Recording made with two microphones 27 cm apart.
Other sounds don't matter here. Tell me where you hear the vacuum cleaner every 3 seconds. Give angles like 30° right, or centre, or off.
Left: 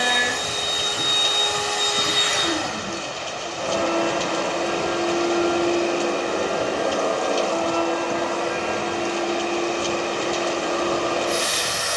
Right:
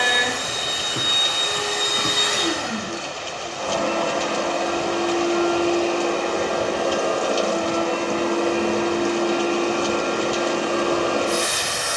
60° right, 20° left, 20° right, 60° right.